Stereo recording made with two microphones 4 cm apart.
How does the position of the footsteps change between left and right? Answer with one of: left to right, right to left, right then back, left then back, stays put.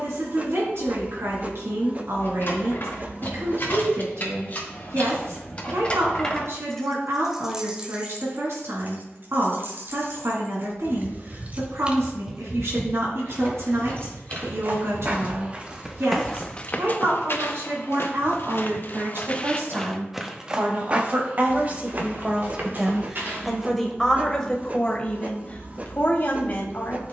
left then back.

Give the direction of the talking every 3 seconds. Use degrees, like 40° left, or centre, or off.
70° right, 70° right, 70° right, 70° right, 70° right, 70° right, 60° right, 20° right, 30° left.